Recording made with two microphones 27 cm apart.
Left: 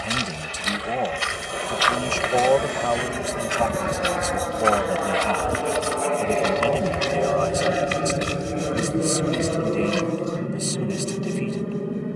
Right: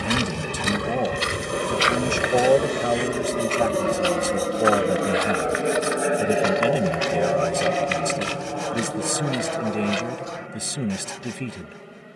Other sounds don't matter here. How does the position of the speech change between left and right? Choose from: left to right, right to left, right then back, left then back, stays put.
stays put.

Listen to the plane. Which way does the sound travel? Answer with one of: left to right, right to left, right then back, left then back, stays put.
right to left.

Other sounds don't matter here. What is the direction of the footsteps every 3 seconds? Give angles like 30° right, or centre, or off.
30° right, 20° left, 40° left, 50° left.